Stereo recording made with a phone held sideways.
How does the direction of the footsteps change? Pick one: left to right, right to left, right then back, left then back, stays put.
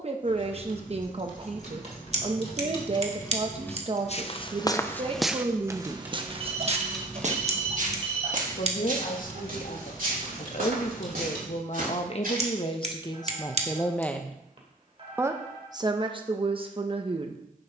left to right.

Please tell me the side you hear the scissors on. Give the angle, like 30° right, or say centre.
50° right.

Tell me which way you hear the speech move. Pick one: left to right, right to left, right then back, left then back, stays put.
left then back.